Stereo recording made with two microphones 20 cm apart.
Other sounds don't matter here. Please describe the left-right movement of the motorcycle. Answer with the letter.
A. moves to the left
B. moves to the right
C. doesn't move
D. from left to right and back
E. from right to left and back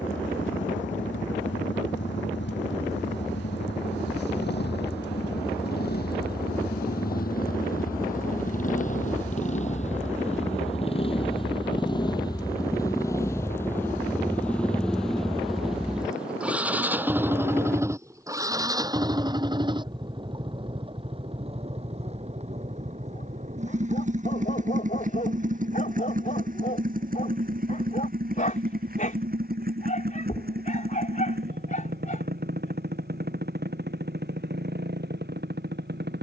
B.